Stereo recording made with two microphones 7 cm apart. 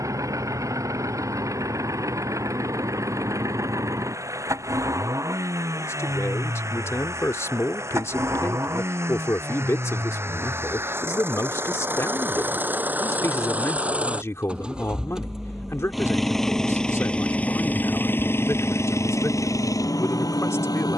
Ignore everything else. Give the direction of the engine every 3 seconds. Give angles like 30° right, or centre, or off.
50° right, 50° right, 40° right, 40° right, 20° right, 10° left, 50° left.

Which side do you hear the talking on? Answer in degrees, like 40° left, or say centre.
40° left.